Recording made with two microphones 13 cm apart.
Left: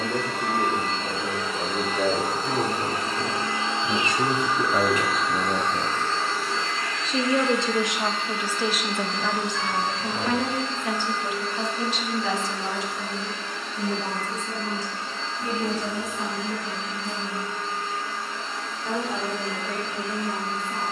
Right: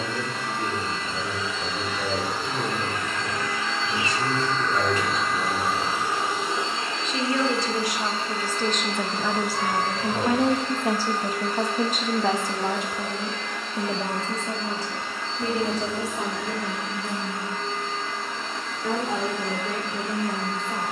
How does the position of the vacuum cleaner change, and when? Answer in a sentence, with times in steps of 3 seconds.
You can hear the vacuum cleaner on the left from 0 s, in the centre from 3 s and on the right from 6 s.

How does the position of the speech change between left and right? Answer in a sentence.
You can hear the speech move to the right.